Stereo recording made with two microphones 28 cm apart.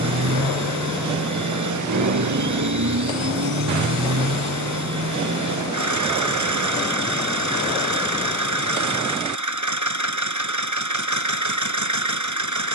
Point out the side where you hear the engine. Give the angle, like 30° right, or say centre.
80° right.